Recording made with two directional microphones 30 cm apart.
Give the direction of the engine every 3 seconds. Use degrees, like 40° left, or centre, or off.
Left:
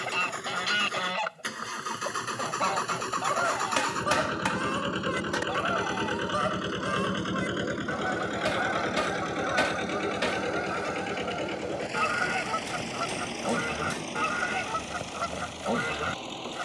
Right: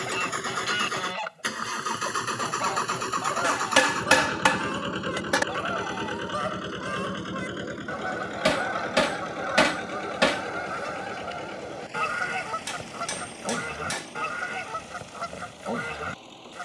30° right, centre, 20° left, 40° left, 50° left, 60° left.